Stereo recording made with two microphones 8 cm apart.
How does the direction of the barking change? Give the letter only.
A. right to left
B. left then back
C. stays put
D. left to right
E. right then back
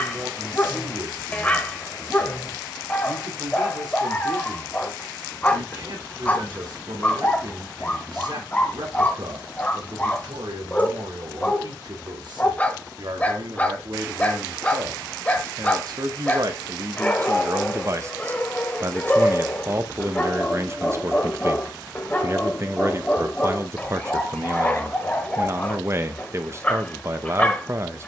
C.